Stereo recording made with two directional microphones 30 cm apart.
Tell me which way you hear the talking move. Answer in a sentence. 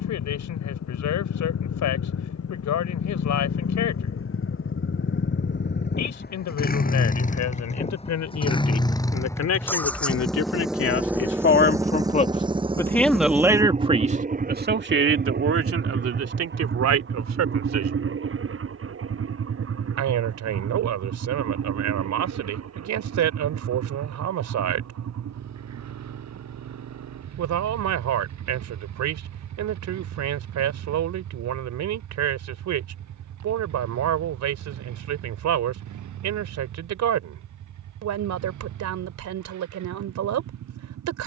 In this clip you hear the talking move to the right.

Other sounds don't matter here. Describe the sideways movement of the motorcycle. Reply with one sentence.
You can hear the motorcycle move to the right.